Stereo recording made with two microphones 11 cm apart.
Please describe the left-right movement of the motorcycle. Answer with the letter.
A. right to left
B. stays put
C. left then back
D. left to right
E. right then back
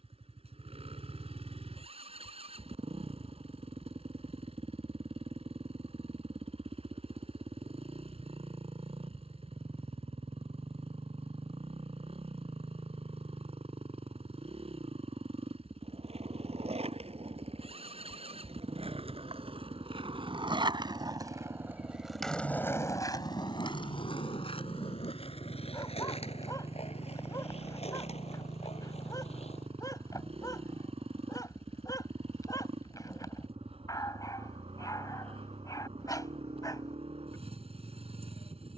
B.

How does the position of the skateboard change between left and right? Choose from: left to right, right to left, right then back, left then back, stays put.
right to left.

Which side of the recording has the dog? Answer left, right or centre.
left.